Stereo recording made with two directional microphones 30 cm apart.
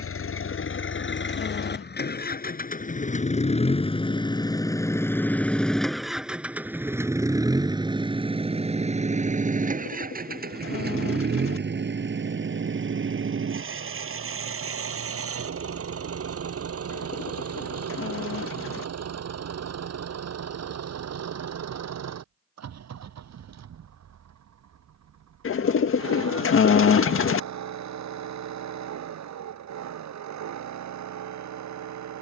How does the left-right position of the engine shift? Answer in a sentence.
You can hear the engine go from the left side to the right.